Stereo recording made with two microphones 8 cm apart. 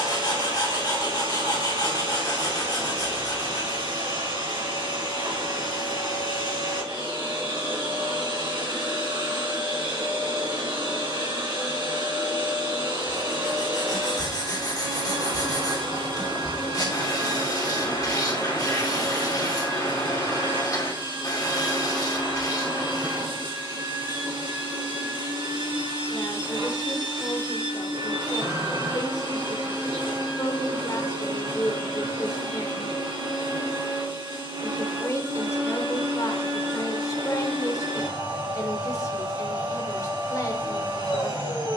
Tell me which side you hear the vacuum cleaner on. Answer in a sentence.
In this clip you hear the vacuum cleaner on the right.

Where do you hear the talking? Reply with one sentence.
In this clip you hear the talking on the left.